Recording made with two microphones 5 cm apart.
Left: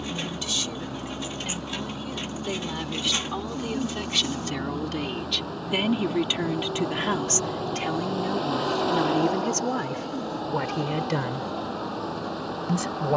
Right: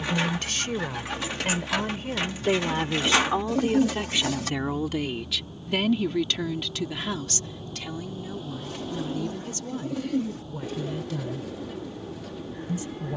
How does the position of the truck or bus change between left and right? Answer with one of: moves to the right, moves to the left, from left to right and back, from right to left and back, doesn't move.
doesn't move.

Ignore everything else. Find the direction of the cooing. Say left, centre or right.
right.